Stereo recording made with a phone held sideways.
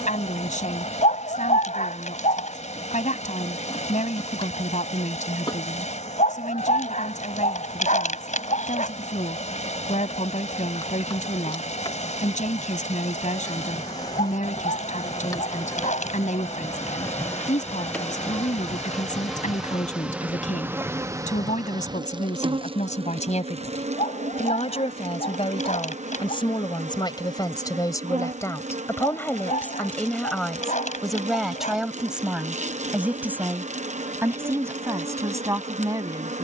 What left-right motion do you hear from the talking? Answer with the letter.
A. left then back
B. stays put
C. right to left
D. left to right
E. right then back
D.